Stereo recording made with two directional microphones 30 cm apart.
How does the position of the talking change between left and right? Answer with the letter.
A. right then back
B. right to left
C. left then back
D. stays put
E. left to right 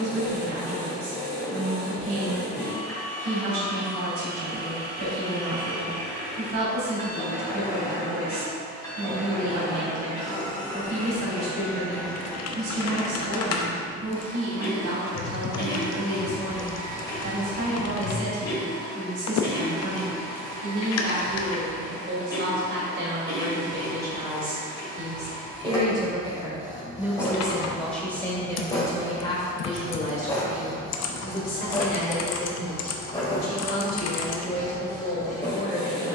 B.